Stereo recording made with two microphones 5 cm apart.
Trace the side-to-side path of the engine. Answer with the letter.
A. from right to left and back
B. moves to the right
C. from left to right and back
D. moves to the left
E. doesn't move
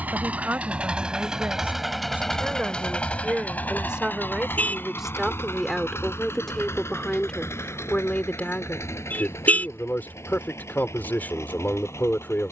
D.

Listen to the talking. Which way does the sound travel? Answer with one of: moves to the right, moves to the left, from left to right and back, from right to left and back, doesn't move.
moves to the left.